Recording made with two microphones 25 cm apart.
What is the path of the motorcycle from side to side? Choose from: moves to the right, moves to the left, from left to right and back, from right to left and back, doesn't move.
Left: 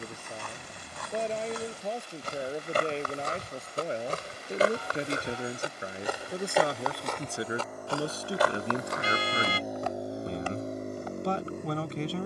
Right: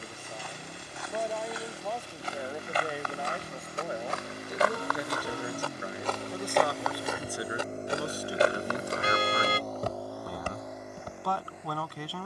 moves to the left.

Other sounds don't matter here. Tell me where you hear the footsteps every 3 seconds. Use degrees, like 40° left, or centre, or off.
60° left, 40° left, 10° right, 50° right.